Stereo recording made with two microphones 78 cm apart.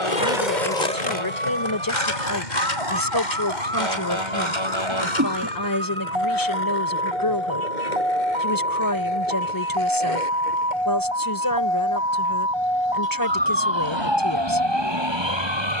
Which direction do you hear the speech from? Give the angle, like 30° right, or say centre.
30° left.